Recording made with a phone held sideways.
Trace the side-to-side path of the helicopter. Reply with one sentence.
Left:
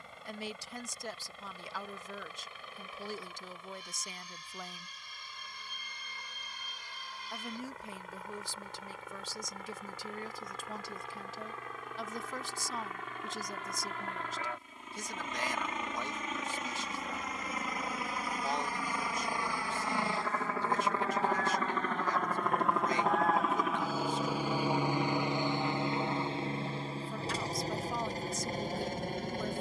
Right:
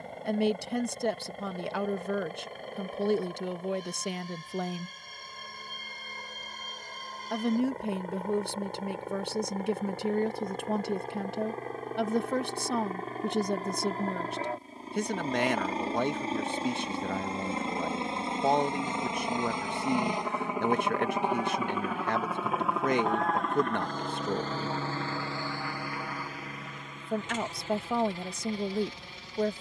In this clip you hear the helicopter go from the right side to the left.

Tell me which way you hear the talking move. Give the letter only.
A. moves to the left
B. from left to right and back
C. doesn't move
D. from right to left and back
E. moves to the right
C.